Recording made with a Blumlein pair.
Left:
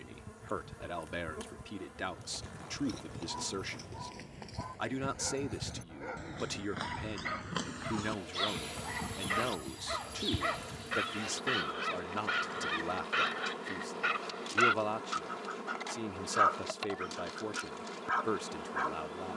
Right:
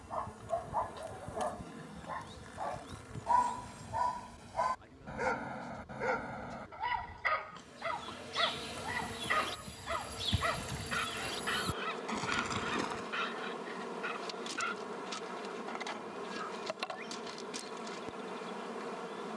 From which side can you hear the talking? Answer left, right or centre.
left.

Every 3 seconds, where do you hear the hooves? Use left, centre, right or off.
left, left, left, centre, right, off, off.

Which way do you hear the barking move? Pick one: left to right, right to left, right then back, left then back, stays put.
right to left.